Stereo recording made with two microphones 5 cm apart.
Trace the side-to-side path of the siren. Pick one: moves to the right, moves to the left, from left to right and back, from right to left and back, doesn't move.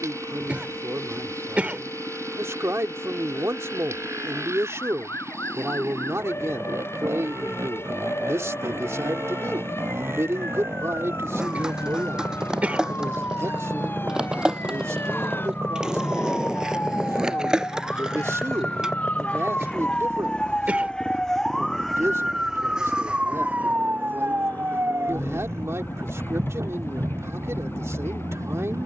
moves to the right.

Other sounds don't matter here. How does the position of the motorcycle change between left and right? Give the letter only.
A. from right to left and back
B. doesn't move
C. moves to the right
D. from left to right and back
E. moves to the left
E.